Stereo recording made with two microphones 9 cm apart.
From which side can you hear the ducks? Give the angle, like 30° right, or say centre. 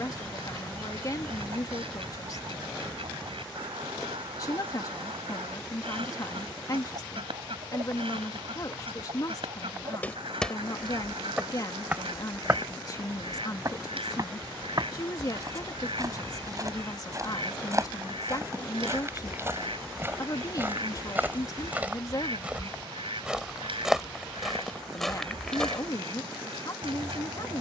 80° right.